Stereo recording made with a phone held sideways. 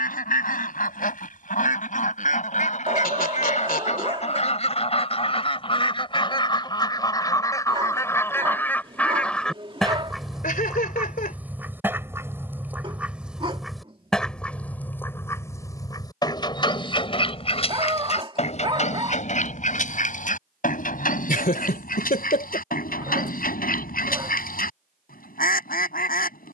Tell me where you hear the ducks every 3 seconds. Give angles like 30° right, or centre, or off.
60° left, 40° left, 20° left, centre, centre, 30° left, 50° left, 60° left, 60° left.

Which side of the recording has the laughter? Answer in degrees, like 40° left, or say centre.
60° left.